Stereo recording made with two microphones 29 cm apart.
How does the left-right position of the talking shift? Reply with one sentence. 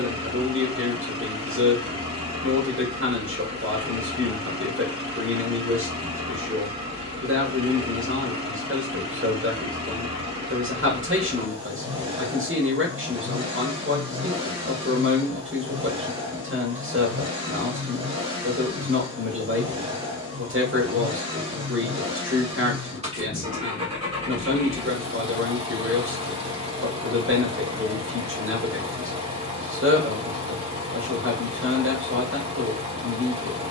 You can hear the talking stay in one place.